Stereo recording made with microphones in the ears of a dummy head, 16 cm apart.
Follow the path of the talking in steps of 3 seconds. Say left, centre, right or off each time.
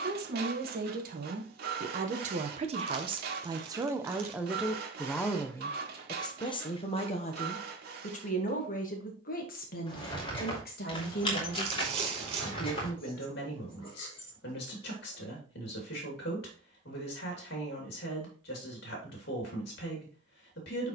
right, centre, left, left, left, left, left.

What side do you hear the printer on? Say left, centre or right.
right.